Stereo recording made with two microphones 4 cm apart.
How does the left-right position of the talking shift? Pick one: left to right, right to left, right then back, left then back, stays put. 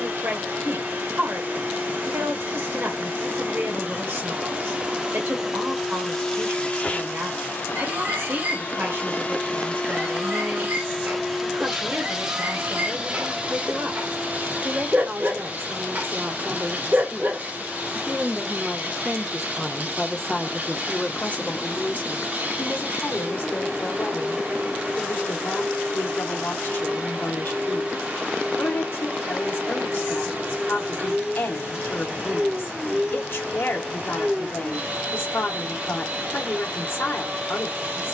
right to left.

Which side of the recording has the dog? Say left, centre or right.
right.